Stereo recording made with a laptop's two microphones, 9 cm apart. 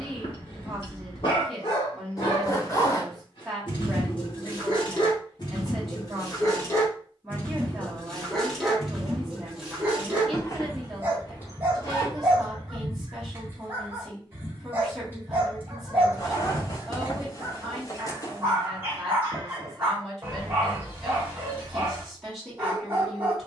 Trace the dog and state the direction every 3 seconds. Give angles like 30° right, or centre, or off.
60° left, 50° left, 20° left, 20° right, 20° right, 20° right, 20° right, 20° right.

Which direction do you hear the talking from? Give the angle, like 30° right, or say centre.
centre.